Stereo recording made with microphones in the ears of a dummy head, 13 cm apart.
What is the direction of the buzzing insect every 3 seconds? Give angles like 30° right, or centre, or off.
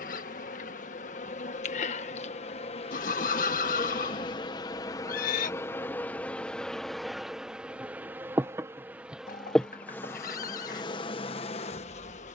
50° left, 30° left, centre, 20° left.